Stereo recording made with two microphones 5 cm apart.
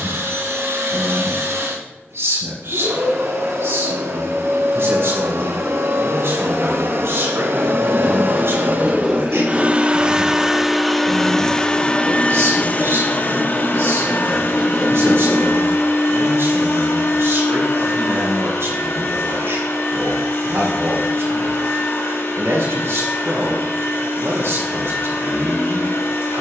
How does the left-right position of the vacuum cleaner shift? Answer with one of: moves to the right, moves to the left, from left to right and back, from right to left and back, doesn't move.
moves to the left.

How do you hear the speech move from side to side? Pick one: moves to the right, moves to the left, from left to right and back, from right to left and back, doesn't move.
doesn't move.